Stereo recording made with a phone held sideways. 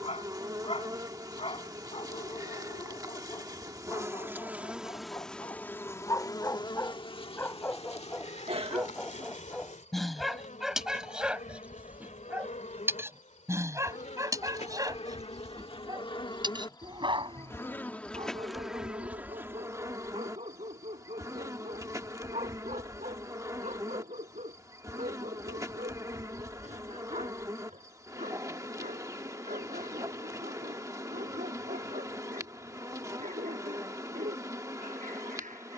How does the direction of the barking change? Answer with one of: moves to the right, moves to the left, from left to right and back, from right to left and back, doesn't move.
moves to the right.